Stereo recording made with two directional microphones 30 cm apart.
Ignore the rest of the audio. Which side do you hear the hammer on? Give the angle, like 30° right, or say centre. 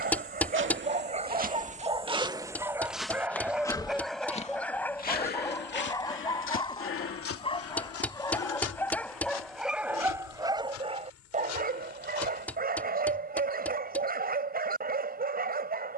centre.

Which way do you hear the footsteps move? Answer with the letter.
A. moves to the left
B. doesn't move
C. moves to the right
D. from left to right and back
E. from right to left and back
A.